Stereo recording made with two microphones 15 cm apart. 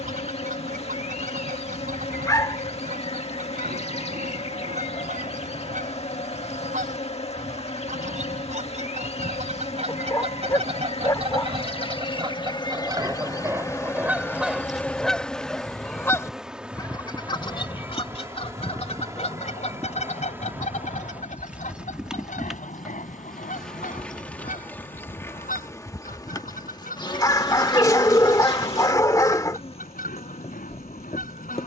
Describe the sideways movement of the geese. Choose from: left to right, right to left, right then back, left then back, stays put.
right to left.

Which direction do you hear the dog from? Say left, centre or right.
left.